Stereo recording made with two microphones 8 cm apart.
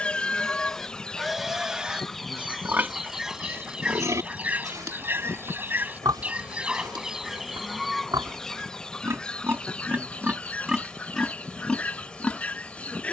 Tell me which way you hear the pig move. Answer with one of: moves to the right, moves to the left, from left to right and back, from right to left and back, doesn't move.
from left to right and back.